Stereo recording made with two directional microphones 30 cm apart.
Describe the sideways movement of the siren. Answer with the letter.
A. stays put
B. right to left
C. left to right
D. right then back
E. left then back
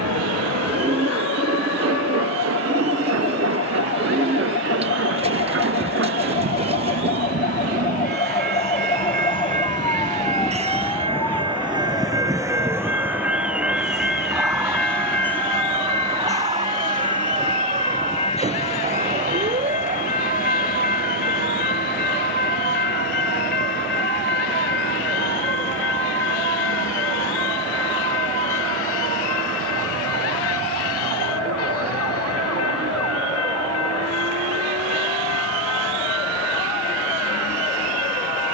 C.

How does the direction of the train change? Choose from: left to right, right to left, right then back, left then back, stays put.
right to left.